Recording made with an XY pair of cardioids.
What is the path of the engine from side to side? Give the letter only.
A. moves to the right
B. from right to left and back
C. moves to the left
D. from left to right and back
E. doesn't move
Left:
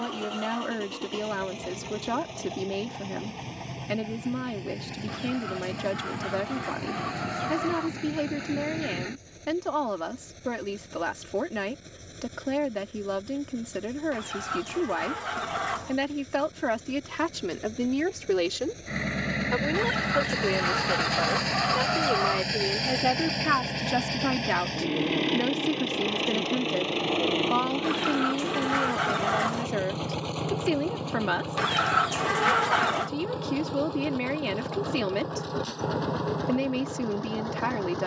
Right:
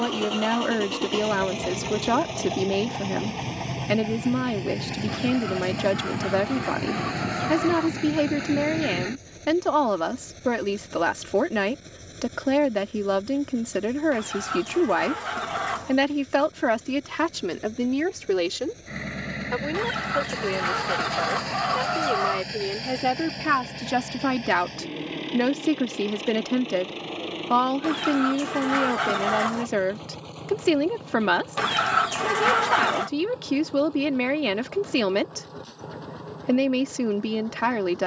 C.